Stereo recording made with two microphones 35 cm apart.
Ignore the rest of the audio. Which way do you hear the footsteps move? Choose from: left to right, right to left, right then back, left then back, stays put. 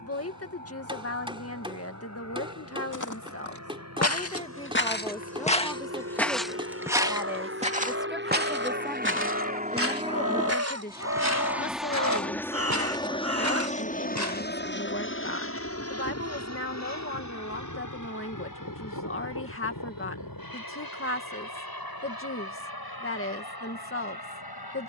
left to right.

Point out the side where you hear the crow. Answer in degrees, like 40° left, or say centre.
40° right.